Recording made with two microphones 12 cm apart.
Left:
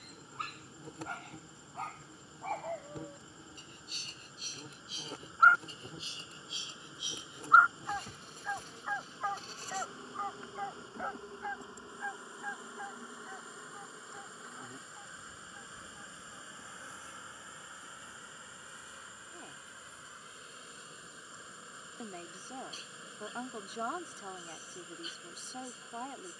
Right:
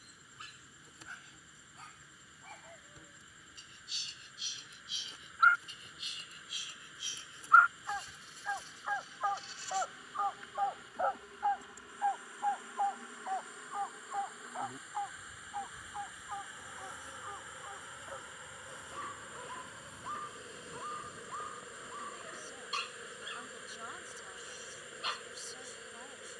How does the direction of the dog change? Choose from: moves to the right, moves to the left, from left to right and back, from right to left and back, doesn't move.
moves to the right.